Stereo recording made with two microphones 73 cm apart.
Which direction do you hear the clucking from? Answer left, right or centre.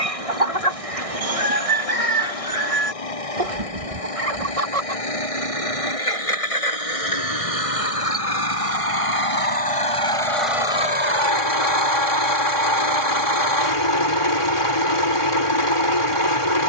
right.